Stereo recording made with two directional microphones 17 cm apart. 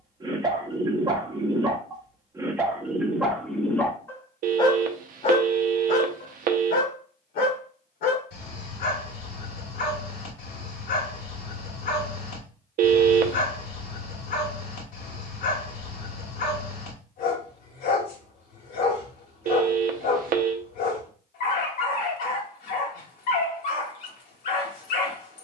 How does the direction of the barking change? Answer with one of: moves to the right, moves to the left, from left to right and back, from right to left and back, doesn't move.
moves to the left.